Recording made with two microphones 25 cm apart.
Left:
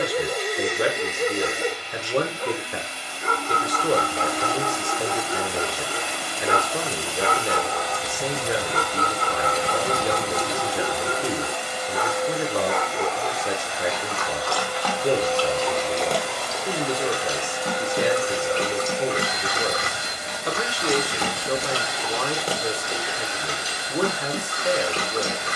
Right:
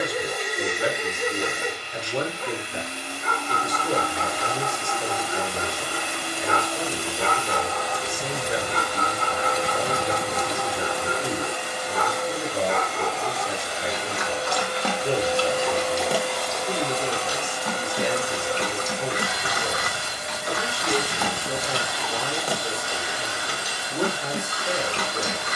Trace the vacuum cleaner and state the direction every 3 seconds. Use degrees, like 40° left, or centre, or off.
50° right, 50° right, 50° right, 50° right, 40° right, centre, 20° left, 20° left, 20° left.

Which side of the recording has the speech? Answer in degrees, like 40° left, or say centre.
70° left.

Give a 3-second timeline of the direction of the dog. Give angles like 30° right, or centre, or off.
30° left, 30° left, 30° left, 30° left, 10° right, centre, 30° left, 30° left, 30° left.